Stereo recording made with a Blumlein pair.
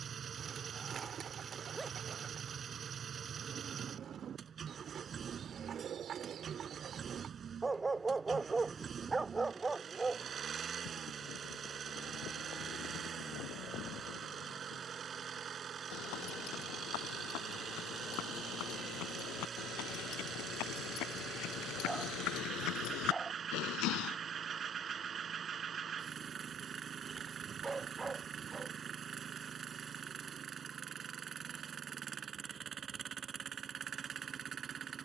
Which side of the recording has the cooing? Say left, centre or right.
right.